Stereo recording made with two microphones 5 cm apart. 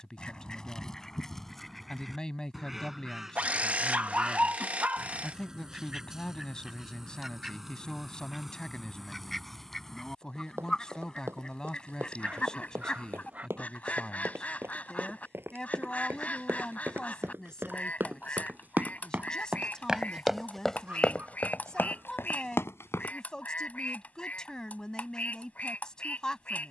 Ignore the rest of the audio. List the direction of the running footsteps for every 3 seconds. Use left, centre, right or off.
off, off, off, right, right, right, right, left, off.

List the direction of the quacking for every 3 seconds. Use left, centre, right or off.
centre, centre, centre, centre, left, left, left, left, left.